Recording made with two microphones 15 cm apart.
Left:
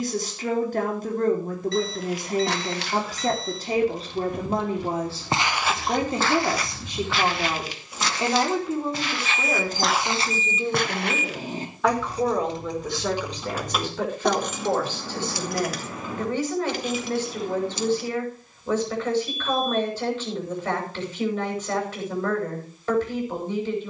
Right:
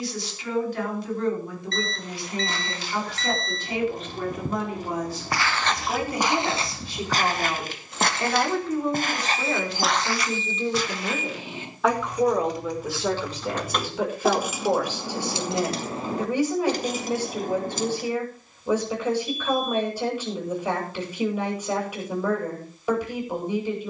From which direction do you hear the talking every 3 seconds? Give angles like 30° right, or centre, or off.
50° left, 30° left, 20° left, centre, 10° right, 10° right, 10° right, 10° right.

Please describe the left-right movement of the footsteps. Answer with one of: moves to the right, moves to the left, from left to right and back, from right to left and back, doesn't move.
from left to right and back.